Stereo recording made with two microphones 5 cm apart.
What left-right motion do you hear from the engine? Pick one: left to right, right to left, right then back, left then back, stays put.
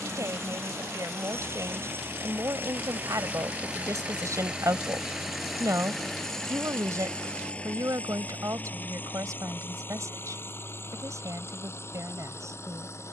right to left.